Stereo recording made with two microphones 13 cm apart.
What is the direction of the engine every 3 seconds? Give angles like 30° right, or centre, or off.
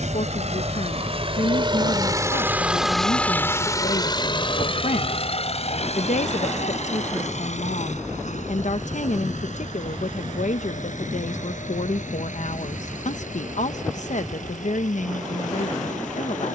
40° right, 40° left, 70° left, 70° left, 80° left, 80° left.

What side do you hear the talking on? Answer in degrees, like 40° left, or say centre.
70° left.